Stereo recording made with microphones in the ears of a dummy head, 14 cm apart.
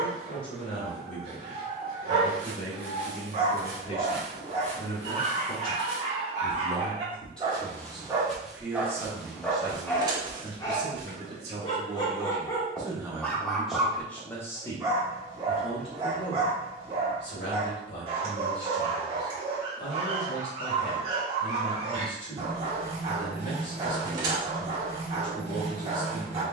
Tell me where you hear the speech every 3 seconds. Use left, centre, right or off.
left, left, centre, right, centre, left, left, left, left.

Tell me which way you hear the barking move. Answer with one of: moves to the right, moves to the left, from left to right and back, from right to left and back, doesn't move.
from right to left and back.